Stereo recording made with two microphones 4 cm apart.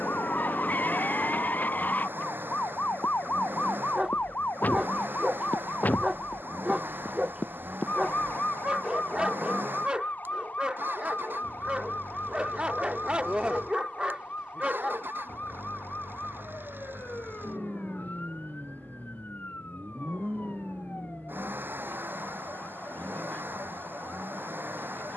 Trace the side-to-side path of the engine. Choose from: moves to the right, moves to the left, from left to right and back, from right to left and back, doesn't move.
doesn't move.